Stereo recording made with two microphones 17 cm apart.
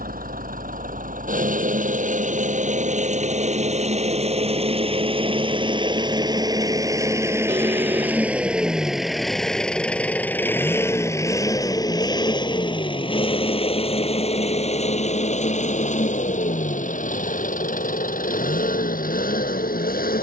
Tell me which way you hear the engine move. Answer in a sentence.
You can hear the engine move from right to left.